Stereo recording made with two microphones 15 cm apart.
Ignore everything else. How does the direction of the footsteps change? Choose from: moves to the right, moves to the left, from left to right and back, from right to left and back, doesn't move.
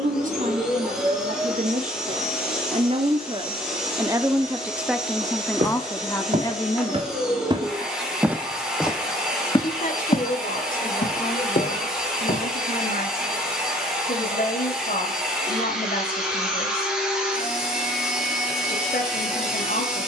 moves to the left.